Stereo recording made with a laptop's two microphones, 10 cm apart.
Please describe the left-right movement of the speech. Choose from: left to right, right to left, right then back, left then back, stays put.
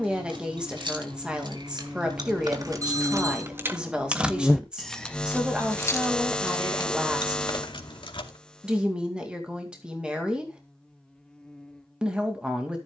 stays put.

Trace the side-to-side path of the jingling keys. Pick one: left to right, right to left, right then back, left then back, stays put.
right to left.